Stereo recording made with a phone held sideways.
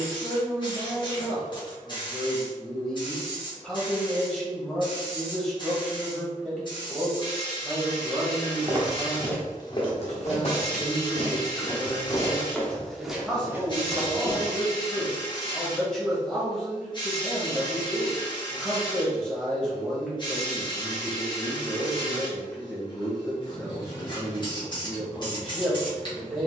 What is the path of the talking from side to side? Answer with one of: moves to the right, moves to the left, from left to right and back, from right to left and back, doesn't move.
doesn't move.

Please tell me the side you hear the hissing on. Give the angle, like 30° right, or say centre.
30° left.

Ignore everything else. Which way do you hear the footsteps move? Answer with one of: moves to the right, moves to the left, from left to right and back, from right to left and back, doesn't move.
from right to left and back.